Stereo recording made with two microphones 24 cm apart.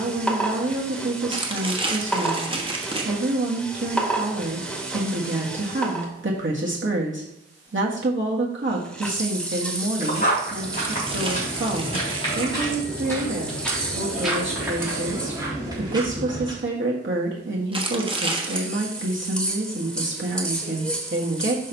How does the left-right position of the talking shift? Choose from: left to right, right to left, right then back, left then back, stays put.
stays put.